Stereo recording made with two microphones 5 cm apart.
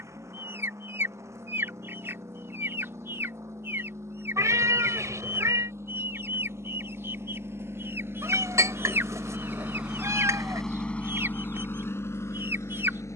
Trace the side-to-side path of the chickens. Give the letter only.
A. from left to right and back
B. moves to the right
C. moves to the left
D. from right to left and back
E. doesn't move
E.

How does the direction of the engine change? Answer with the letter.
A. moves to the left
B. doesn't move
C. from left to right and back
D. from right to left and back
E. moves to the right
A.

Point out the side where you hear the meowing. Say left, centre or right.
right.